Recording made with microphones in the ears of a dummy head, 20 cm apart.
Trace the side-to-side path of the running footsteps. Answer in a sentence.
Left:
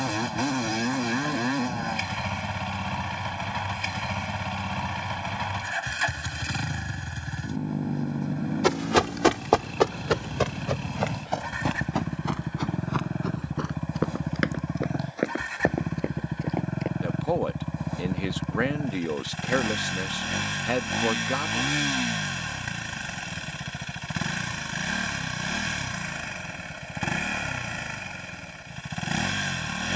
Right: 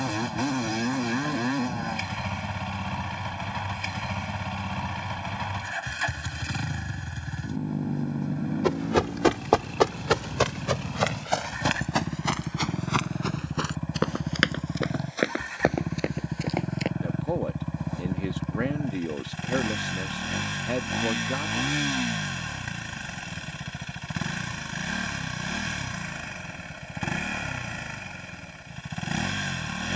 You can hear the running footsteps move to the right.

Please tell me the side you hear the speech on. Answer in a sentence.
In this clip you hear the speech on the left.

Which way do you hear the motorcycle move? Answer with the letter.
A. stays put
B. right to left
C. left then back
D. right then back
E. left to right
A.